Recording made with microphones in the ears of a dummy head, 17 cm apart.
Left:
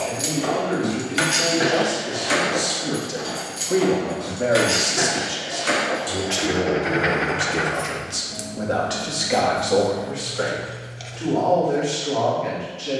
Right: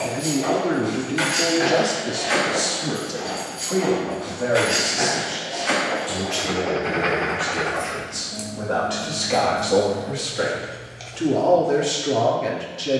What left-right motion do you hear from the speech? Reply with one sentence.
In this clip you hear the speech move from right to left and back again.